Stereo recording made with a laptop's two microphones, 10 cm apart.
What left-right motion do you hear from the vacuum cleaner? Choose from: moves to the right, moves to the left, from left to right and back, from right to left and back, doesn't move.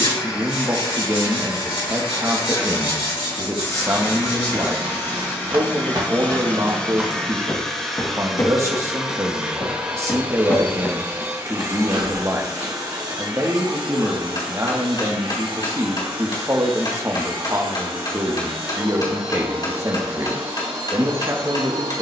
moves to the right.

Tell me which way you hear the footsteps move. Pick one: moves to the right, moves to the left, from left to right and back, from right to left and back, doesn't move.
from right to left and back.